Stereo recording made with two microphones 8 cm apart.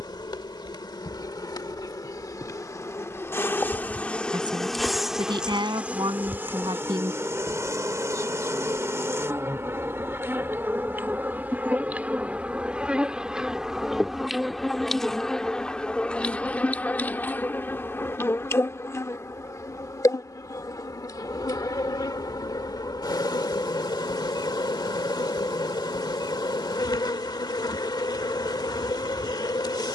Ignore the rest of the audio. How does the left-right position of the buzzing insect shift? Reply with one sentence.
In this clip you hear the buzzing insect go right and come back.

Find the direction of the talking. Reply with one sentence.
You can hear the talking on the right.